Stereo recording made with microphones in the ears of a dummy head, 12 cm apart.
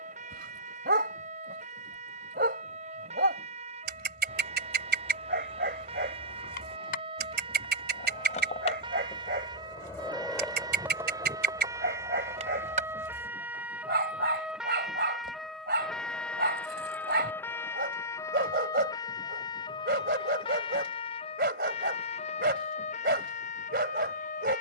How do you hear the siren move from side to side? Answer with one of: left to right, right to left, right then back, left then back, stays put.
right to left.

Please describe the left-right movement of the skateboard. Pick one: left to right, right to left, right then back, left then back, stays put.
left to right.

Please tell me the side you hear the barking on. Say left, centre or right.
right.